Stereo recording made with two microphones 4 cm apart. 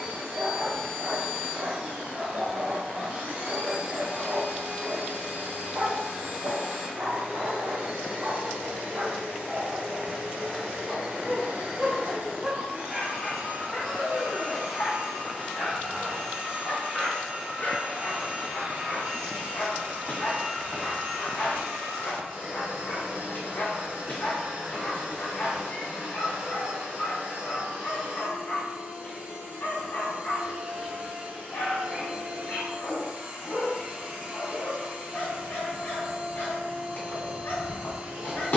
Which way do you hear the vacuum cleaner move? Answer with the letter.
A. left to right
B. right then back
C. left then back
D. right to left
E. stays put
E.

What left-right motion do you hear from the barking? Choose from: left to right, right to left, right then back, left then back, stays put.
right to left.